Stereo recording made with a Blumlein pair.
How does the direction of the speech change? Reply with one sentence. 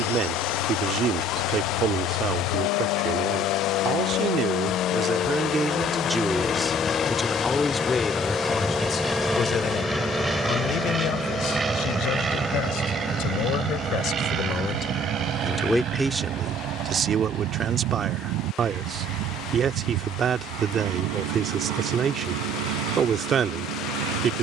You can hear the speech move from right to left and back again.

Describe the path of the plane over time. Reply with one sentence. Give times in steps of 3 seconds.
In this clip you hear the plane on the left from 0 s, in the centre from 6 s and on the right from 12 s.